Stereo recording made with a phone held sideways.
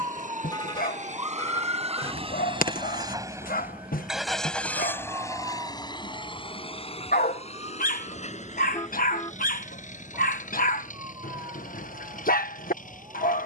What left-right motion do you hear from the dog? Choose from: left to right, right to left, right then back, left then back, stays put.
stays put.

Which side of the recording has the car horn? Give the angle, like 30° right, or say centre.
30° left.